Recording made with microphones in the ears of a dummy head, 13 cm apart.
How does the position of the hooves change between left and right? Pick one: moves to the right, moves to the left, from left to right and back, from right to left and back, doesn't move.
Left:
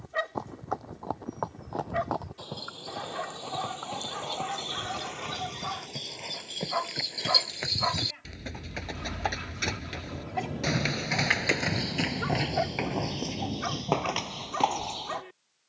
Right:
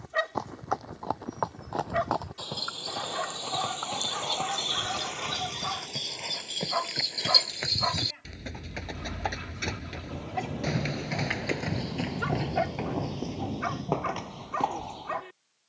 moves to the left.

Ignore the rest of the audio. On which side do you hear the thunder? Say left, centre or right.
right.